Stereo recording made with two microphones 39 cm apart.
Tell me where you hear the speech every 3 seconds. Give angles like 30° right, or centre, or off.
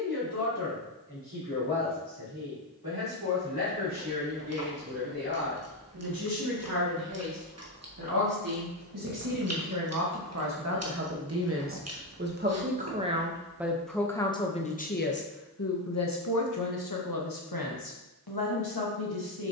70° right, 60° right, 60° right, 40° right, centre, 50° left, 70° left.